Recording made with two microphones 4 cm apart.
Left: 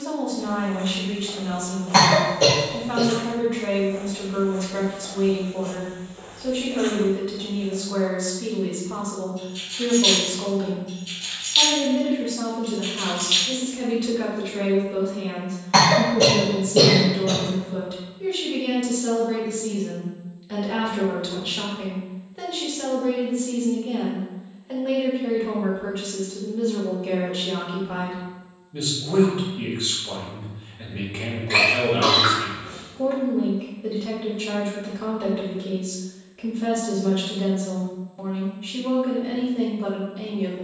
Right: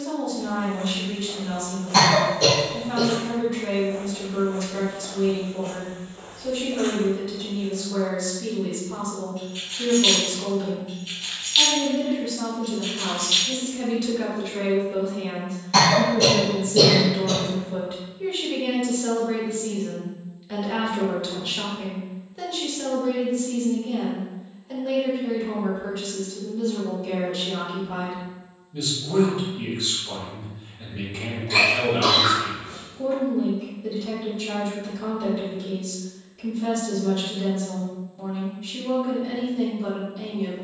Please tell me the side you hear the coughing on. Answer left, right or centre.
left.